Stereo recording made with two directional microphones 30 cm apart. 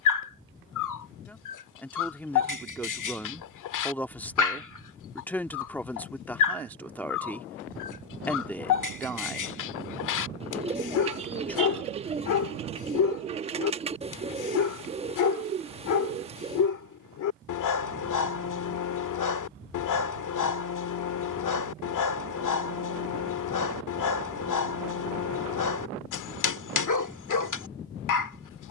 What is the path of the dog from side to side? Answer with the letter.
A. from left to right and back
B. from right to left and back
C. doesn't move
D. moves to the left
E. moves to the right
C.